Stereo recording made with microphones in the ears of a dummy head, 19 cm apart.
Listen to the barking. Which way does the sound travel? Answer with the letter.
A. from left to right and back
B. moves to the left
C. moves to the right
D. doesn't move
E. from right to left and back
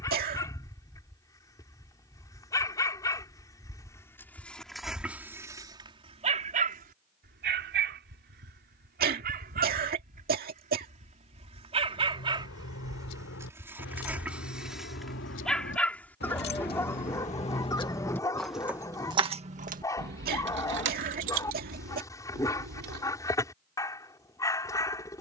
A.